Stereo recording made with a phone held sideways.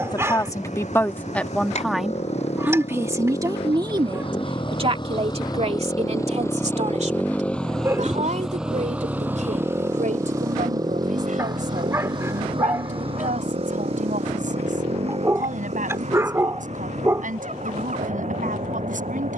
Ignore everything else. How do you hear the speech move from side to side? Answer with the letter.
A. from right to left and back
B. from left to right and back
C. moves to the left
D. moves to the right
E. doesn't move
D.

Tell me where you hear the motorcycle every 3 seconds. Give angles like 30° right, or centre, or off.
60° left, 40° left, 10° left, 20° right, 40° right, 60° right, 60° right.